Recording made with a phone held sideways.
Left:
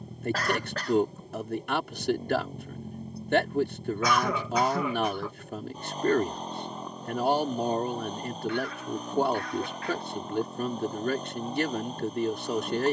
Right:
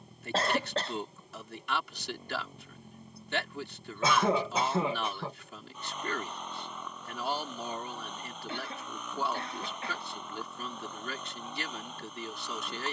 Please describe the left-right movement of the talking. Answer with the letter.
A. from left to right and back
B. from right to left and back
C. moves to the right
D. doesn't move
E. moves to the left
D.